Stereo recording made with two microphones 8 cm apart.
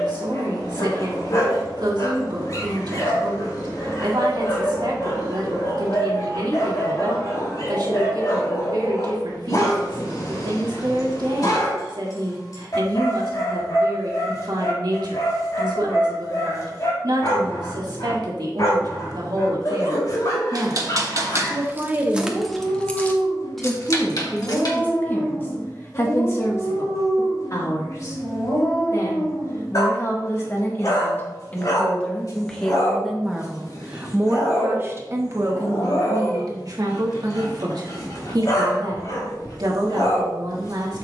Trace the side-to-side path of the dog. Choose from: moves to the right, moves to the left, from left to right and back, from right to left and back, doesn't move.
doesn't move.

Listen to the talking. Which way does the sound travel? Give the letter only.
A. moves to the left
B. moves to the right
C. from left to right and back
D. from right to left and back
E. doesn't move
D.